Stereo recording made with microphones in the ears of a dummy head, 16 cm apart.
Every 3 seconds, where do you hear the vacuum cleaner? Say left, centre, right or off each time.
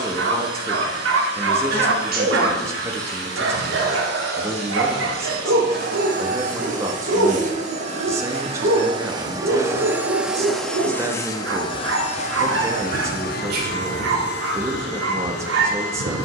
right, right, right, centre, left, left.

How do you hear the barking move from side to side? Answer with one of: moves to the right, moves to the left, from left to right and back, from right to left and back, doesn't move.
doesn't move.